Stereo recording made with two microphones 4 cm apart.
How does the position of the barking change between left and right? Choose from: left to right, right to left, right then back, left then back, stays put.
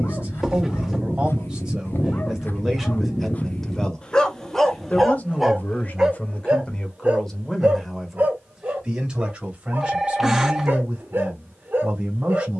left to right.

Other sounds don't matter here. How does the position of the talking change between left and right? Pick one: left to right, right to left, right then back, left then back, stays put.
left then back.